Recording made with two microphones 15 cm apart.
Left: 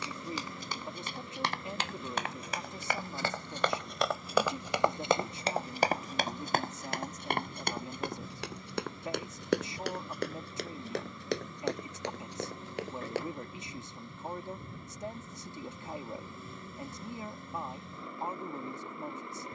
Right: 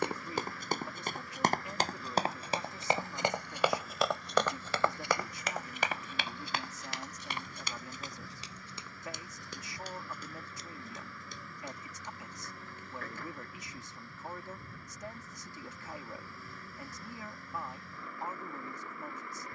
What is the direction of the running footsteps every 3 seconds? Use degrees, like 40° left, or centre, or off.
40° right, 10° left, 50° left, 70° left, 80° left, off, off.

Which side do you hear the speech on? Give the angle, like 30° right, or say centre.
20° left.